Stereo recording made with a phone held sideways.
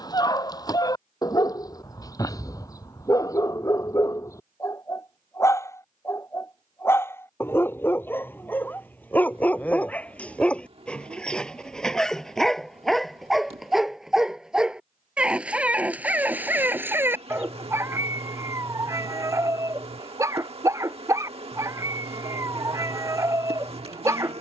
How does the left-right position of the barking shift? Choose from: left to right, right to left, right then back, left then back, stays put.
left to right.